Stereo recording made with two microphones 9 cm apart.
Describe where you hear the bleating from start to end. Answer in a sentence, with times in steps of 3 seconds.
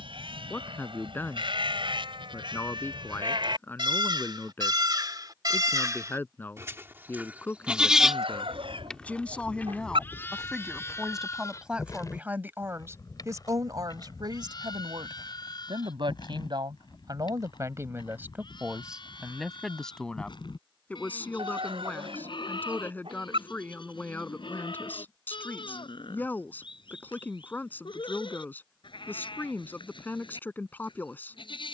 In this clip you hear the bleating on the right from 0 s, in the centre from 6 s and on the left from 9 s.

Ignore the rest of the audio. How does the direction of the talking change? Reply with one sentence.
In this clip you hear the talking move from left to right and back again.